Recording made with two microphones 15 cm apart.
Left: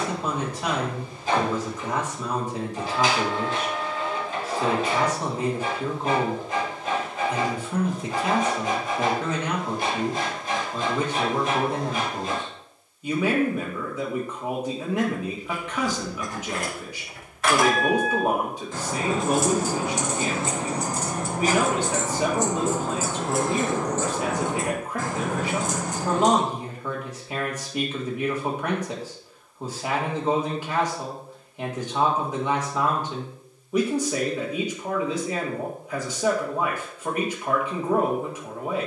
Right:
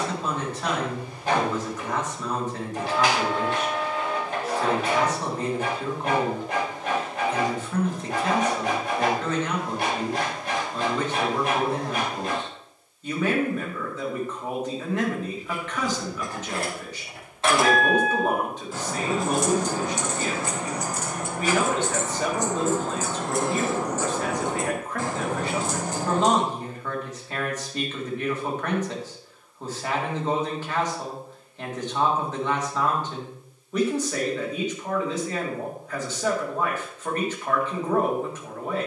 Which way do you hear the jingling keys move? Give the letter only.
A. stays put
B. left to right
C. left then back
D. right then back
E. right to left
C.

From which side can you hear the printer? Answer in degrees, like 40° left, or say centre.
70° right.